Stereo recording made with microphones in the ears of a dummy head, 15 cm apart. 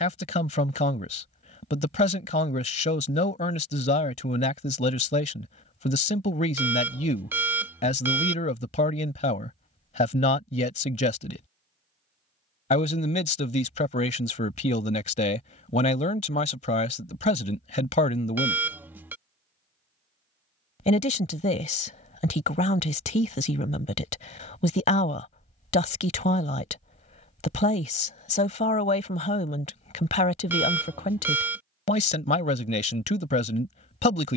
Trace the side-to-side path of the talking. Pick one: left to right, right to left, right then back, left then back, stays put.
stays put.